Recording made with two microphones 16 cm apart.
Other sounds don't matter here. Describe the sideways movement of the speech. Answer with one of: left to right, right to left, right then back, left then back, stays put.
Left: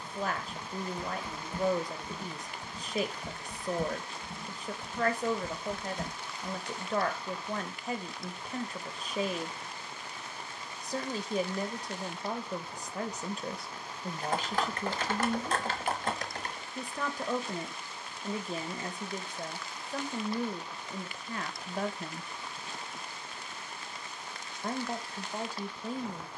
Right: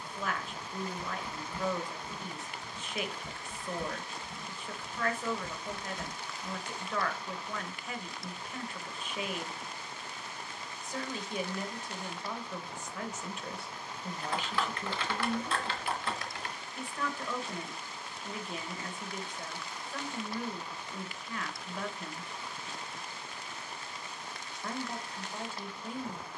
stays put.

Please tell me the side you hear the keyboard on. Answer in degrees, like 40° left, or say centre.
40° left.